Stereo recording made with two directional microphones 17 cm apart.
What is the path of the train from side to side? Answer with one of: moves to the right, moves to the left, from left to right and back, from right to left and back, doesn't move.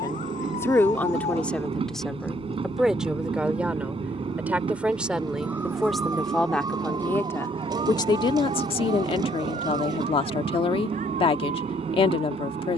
doesn't move.